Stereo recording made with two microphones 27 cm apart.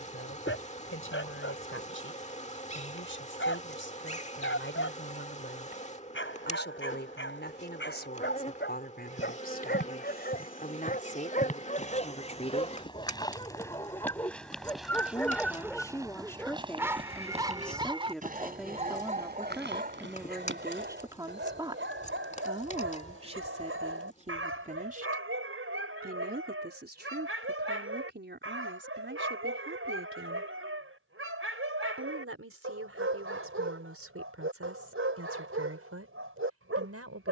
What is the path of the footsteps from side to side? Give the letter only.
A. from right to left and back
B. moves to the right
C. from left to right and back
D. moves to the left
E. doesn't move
B.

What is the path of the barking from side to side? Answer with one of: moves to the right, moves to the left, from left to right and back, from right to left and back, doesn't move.
moves to the right.